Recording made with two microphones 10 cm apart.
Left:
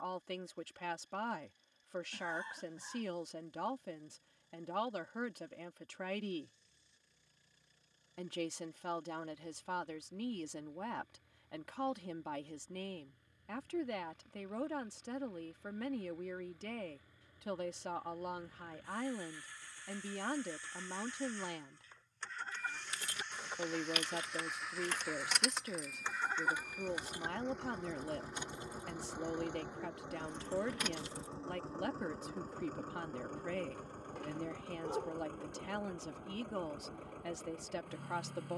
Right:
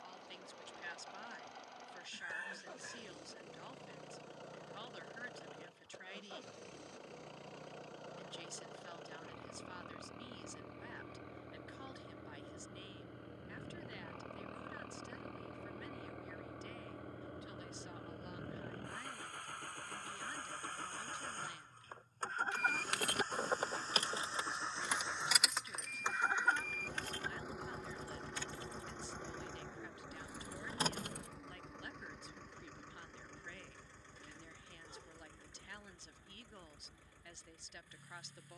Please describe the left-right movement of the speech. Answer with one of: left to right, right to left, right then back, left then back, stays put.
stays put.